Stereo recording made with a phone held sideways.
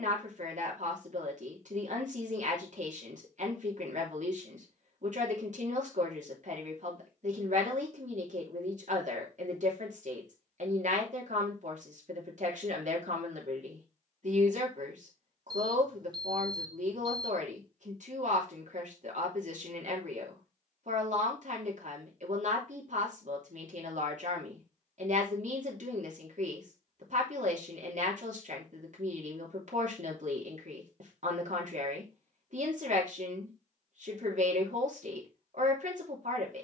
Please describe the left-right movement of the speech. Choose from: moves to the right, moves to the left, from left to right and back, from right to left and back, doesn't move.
doesn't move.